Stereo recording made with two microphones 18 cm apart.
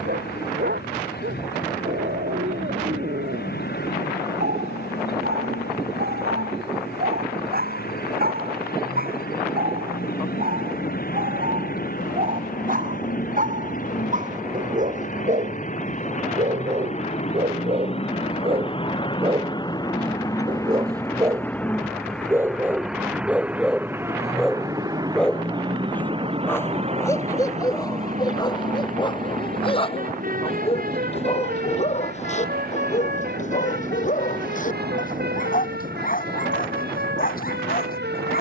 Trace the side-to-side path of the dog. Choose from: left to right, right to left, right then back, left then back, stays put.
right to left.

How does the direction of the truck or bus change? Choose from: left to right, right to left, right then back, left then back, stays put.
left to right.